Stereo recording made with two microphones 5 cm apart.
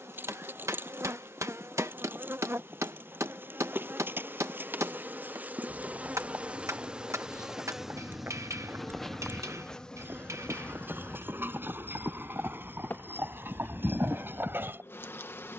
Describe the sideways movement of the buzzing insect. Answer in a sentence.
In this clip you hear the buzzing insect move from right to left.